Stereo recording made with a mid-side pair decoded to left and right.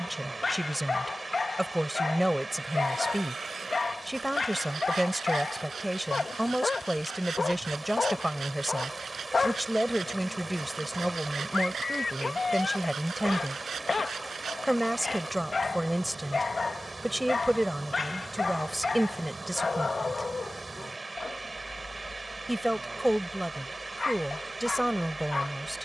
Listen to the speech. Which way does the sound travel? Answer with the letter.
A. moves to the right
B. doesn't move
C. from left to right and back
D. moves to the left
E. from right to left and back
B.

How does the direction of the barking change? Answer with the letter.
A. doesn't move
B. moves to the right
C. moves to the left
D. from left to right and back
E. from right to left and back
A.